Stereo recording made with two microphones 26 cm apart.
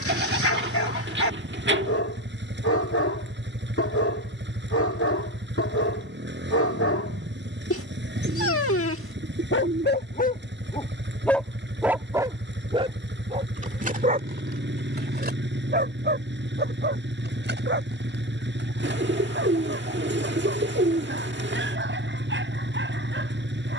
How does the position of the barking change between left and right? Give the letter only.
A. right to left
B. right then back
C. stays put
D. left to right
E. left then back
D.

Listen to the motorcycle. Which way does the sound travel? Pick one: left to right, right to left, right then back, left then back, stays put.
stays put.